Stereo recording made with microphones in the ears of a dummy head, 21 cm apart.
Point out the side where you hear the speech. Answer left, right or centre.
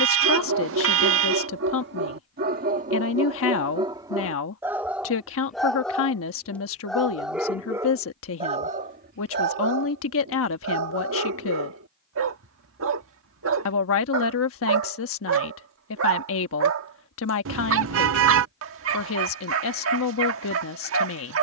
left.